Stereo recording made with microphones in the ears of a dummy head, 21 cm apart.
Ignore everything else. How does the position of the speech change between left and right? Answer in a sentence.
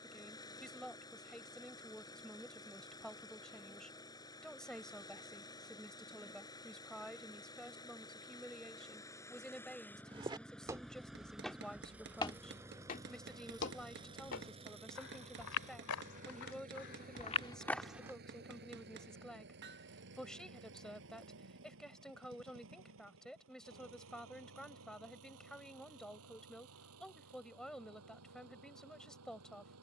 You can hear the speech stay in one place.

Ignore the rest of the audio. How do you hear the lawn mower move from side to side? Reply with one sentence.
You can hear the lawn mower go from the left side to the right.